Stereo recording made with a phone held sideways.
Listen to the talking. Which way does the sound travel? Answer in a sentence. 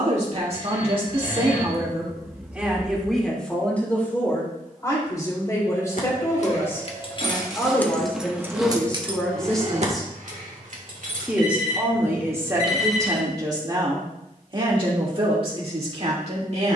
You can hear the talking move from right to left and back again.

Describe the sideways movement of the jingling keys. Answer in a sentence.
You can hear the jingling keys travel towards the right.